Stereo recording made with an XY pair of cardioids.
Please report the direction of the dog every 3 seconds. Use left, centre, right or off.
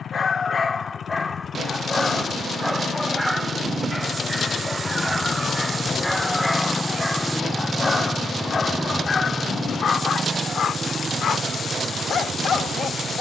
left, centre, left, left, left.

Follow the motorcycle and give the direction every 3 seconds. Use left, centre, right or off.
left, left, centre, right, right.